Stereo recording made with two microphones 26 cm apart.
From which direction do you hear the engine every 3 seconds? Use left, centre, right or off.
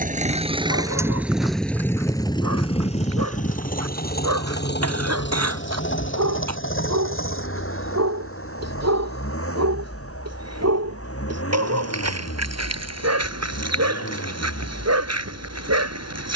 centre, left, left, left, left, left.